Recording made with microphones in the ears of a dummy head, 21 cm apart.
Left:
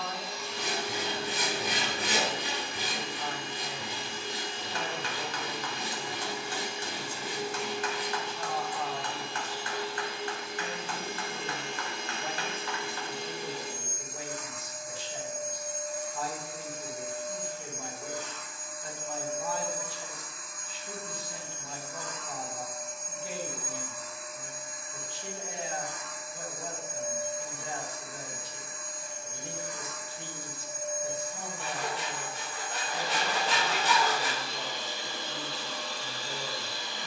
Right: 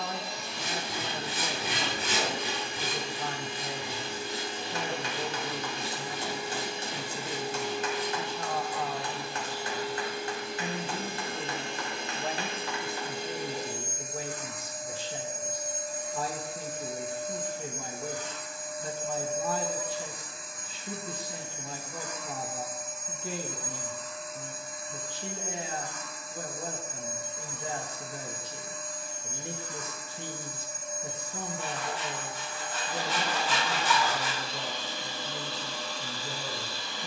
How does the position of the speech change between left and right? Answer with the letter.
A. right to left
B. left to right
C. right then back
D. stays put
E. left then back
D.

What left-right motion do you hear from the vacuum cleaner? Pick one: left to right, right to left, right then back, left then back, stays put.
right to left.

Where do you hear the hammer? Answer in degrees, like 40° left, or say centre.
20° right.